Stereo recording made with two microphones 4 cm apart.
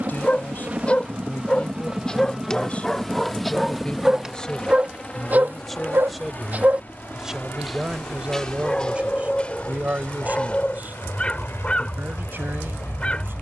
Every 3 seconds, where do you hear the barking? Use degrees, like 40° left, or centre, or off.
20° left, 20° right, 10° right, 20° left, 30° left.